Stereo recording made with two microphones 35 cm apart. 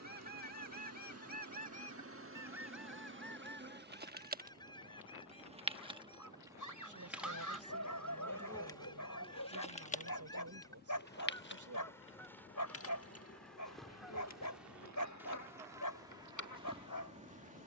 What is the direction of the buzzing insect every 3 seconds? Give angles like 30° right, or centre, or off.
40° right, 20° right, centre, 20° left, 40° left, 60° left.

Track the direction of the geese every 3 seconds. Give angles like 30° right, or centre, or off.
20° right, 10° left, 10° left, 10° left, centre, 10° right.